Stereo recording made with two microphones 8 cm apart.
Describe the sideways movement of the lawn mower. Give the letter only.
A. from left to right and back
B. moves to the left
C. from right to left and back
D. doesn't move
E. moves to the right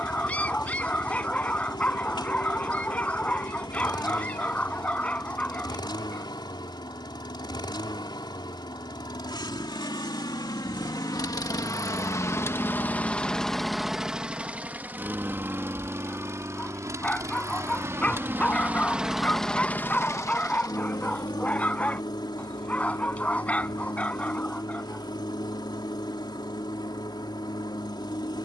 A.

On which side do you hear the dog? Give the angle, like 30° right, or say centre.
20° left.